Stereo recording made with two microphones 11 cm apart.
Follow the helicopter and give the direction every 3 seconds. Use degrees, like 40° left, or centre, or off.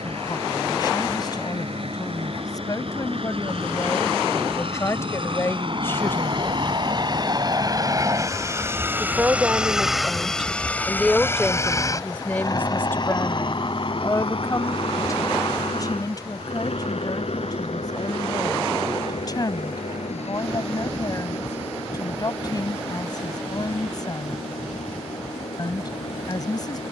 70° right, 60° right, 40° right, 10° left, 40° left, 60° left, 70° left, 70° left, 80° left.